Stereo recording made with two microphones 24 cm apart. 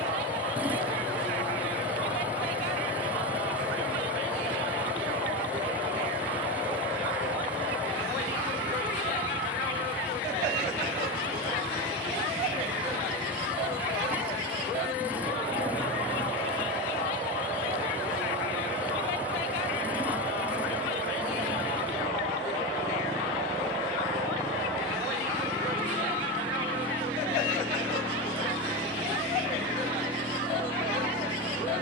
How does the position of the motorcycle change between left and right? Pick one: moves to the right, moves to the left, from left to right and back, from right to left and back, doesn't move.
doesn't move.